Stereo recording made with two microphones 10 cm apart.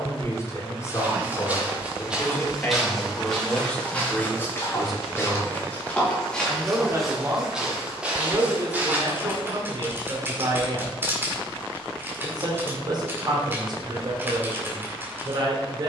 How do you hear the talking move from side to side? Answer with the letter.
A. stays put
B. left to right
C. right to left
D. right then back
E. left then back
B.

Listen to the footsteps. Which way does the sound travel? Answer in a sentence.
You can hear the footsteps move from right to left and back again.